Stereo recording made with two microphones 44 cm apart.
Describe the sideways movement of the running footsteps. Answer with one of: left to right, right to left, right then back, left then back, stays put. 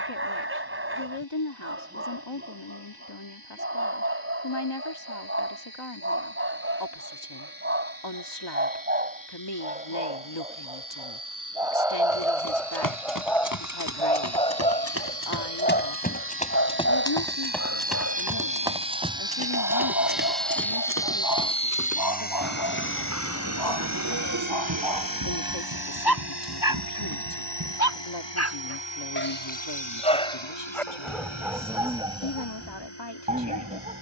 left to right.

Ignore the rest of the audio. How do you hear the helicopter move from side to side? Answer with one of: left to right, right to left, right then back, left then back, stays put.
right to left.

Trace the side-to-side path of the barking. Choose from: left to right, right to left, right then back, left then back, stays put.
left then back.